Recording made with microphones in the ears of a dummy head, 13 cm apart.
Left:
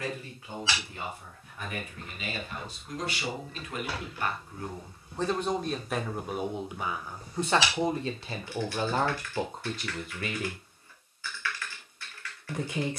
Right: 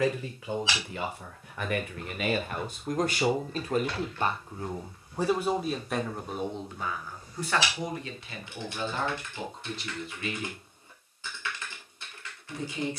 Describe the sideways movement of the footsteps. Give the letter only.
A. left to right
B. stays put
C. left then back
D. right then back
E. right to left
E.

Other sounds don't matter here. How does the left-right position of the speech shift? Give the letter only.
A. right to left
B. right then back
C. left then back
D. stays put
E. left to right
A.